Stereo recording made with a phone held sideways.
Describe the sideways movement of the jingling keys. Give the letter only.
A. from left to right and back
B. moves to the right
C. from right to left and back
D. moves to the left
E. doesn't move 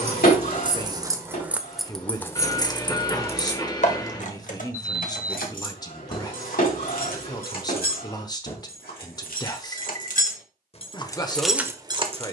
C.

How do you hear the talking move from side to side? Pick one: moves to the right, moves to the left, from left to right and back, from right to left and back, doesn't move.
doesn't move.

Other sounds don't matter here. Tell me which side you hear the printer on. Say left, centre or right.
left.